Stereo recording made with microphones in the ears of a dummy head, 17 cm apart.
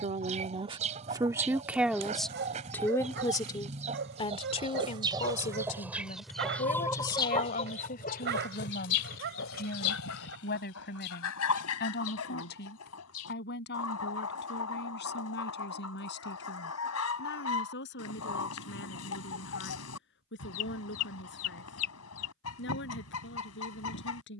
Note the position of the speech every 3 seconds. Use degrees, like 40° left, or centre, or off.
10° right, 30° left, 50° left, 60° left, 60° left, 60° left, 60° left, 70° left.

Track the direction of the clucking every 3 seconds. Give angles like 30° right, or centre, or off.
40° right, 30° right, 30° left, 70° left, 80° left, 80° left, 80° left, 80° left.